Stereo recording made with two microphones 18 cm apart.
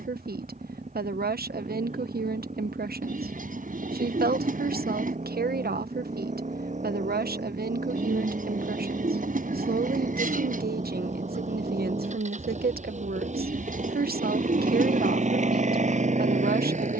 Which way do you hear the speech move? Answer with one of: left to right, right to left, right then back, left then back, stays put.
stays put.